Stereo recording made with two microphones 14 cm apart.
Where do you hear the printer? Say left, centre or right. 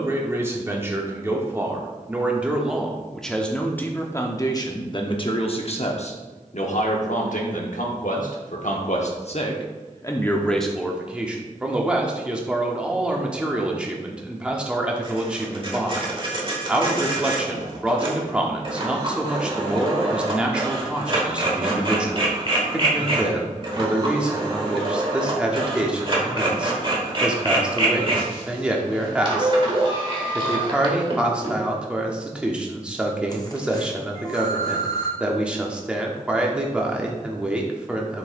right.